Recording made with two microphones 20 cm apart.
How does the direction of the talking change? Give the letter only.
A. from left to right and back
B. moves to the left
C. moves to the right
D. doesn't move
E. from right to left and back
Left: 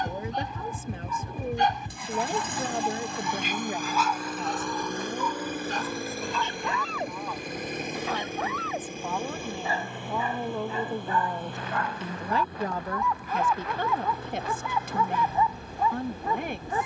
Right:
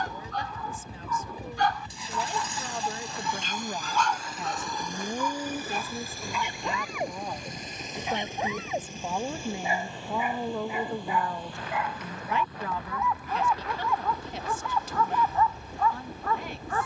A.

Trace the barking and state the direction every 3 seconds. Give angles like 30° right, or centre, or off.
20° left, centre, 20° right, 10° right, centre, 20° left.